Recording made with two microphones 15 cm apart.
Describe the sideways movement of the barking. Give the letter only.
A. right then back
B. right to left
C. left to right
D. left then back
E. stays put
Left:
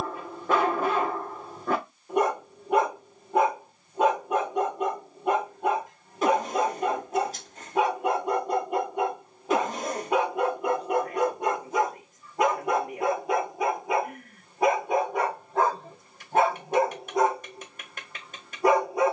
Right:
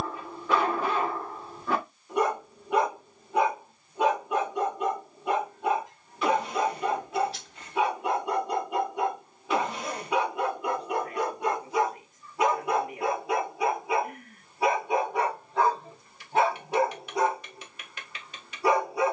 E.